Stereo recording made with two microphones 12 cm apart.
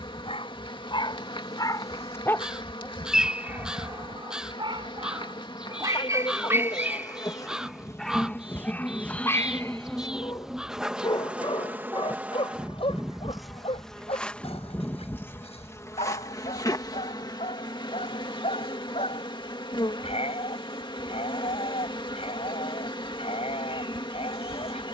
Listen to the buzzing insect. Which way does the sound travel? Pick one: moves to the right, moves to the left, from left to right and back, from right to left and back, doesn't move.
from left to right and back.